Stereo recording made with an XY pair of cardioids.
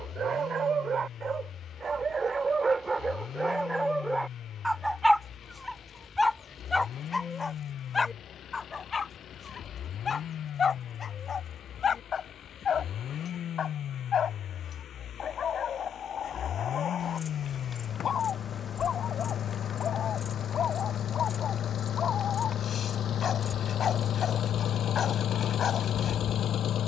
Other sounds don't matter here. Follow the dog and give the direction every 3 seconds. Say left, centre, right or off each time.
right, centre, left, left, left, left, left, left, left.